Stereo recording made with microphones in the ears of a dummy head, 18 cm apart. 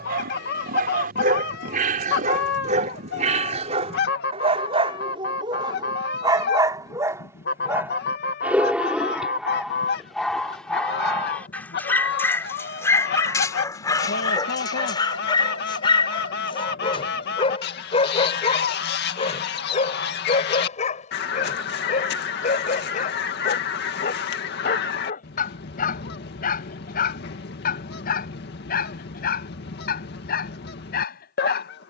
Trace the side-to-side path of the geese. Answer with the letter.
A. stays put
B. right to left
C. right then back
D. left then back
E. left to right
A.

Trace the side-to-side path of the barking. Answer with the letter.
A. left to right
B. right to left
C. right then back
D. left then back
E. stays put
B.